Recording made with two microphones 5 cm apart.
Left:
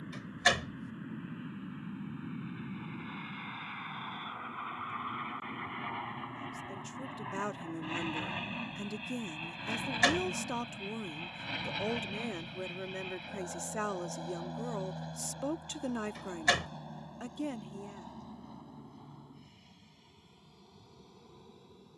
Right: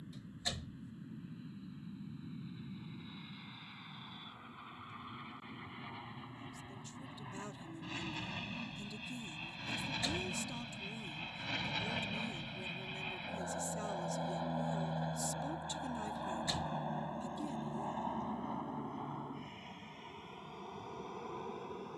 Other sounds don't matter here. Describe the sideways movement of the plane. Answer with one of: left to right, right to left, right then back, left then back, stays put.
left to right.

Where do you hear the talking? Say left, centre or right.
left.